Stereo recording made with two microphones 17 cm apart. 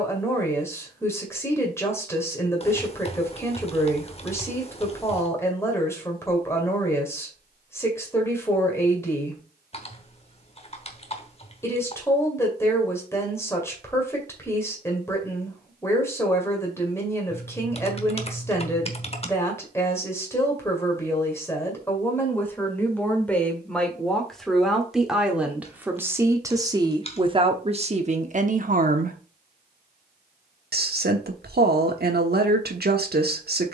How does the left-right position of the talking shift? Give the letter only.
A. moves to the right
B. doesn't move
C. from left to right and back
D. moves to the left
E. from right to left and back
A.